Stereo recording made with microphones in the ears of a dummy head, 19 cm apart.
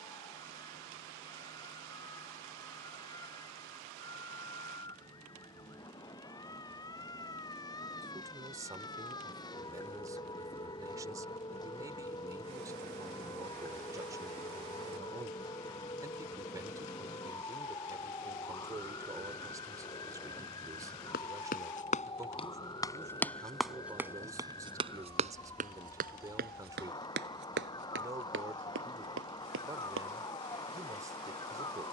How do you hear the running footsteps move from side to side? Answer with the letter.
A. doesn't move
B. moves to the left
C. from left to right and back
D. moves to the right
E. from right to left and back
D.